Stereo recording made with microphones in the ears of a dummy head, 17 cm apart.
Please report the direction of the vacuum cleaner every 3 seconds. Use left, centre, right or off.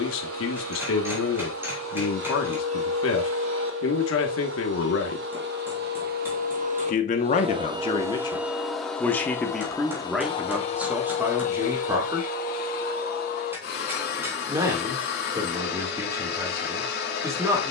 right, right, right, left, left, left.